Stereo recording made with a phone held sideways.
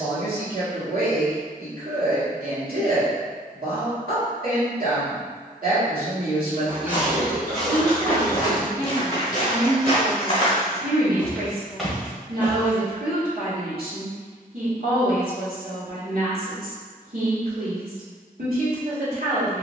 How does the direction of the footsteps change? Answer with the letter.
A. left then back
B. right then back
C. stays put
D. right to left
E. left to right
A.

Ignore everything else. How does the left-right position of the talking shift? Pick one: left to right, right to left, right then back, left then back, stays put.
stays put.